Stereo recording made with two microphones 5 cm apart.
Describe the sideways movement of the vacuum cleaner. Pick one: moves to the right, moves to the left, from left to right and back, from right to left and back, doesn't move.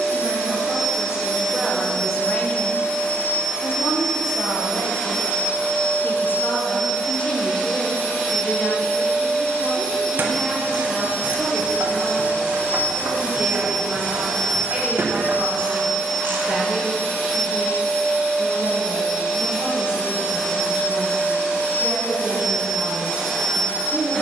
doesn't move.